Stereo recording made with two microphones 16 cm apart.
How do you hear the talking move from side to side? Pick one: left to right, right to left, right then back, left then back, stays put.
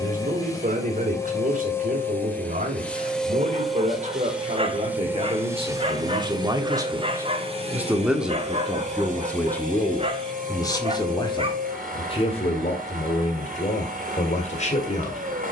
right to left.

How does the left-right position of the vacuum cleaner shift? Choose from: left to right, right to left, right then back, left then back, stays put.
left to right.